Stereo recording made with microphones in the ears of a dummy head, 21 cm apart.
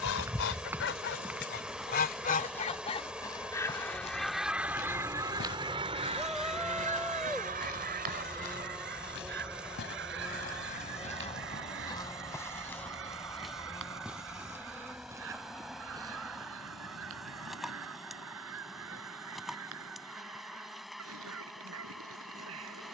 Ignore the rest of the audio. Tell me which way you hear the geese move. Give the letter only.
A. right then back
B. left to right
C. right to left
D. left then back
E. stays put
B.